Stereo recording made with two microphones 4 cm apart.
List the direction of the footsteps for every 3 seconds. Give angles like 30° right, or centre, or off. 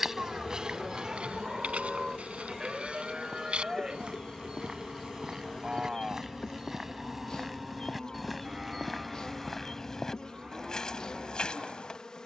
20° right, 20° right, 10° right, 10° left.